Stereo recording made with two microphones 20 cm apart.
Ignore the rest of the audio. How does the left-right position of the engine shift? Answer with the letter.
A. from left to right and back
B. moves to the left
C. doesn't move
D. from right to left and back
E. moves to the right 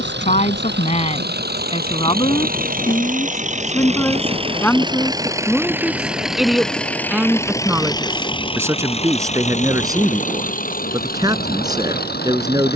B.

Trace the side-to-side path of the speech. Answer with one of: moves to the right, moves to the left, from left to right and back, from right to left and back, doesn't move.
moves to the right.